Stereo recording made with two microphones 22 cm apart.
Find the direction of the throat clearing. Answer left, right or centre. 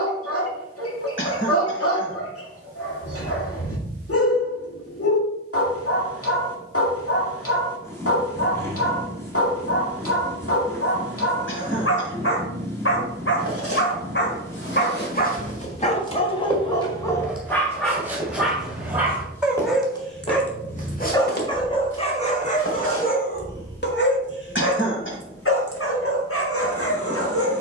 left.